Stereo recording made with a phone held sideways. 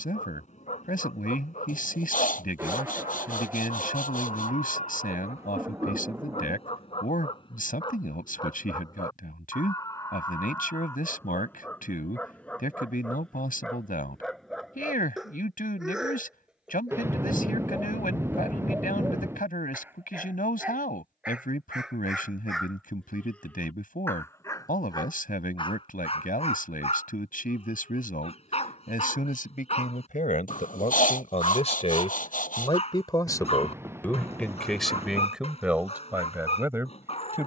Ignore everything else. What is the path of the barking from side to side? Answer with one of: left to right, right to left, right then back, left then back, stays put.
right then back.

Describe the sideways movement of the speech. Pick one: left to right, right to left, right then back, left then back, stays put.
left to right.